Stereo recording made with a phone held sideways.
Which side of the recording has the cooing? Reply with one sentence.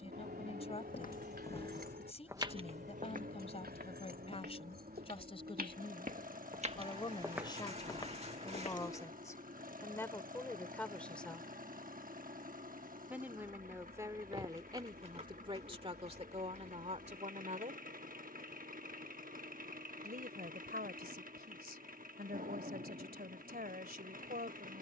In this clip you hear the cooing on the right.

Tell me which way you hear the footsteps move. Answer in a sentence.
You can hear the footsteps go right and come back.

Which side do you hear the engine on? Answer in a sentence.
In this clip you hear the engine on the right.